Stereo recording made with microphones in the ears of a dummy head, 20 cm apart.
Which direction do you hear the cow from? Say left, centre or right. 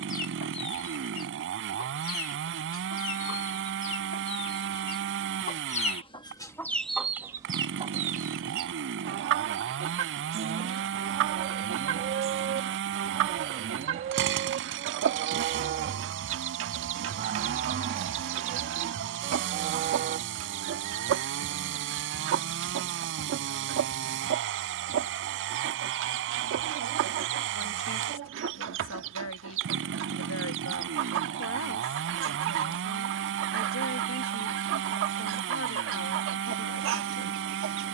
right.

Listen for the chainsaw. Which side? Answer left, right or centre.
right.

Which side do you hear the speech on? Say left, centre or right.
left.